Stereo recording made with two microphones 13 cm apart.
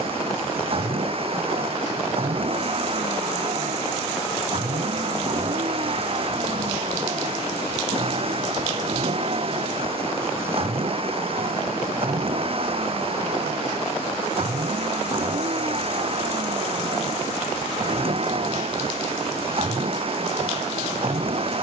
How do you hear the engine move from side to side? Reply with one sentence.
In this clip you hear the engine stay put.